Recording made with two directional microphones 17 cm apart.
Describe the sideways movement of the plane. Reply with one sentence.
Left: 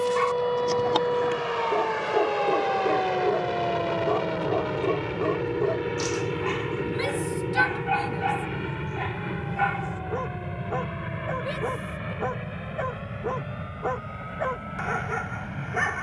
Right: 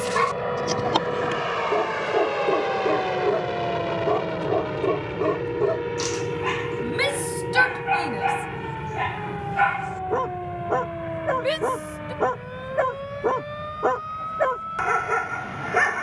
In this clip you hear the plane travel towards the left.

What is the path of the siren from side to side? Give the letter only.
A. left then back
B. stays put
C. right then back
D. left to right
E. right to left
D.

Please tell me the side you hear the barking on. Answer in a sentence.
In this clip you hear the barking on the right.